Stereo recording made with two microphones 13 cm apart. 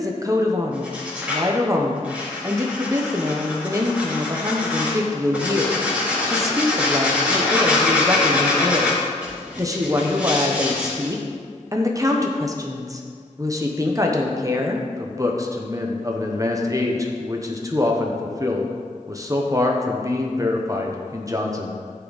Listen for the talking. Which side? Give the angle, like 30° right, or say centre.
20° right.